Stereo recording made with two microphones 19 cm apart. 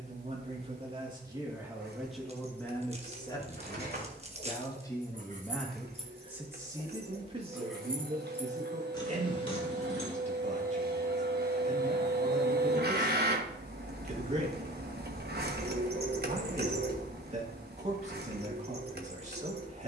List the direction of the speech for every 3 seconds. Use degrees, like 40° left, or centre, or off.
10° right, 20° left, 30° right, 40° right, 40° right, 40° right, 40° right.